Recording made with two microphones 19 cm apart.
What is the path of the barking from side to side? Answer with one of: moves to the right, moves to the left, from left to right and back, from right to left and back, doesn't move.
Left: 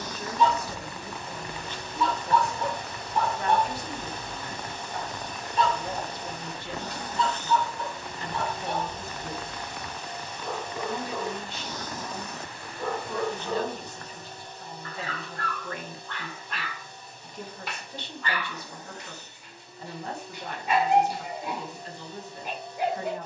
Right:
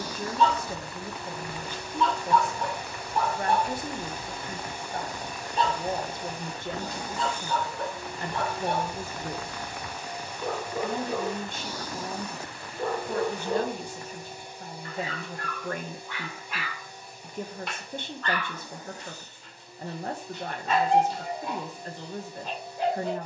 from left to right and back.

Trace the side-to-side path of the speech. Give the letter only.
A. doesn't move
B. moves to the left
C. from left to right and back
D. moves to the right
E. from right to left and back
A.